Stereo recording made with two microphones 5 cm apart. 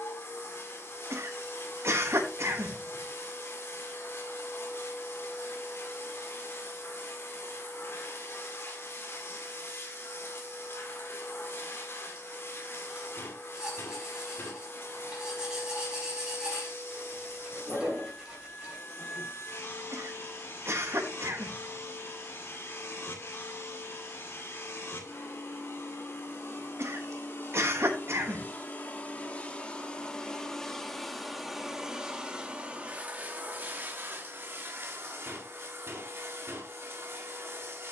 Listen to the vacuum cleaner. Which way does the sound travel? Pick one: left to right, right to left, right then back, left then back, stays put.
left to right.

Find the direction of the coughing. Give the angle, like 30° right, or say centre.
60° right.